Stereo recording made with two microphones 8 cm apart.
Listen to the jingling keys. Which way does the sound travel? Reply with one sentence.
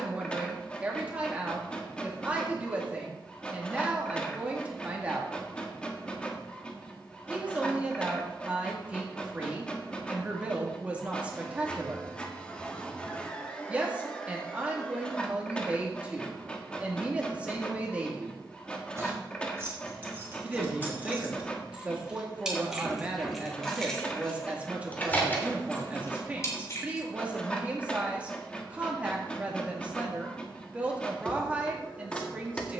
In this clip you hear the jingling keys move to the left.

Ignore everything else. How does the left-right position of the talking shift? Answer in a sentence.
In this clip you hear the talking stay in one place.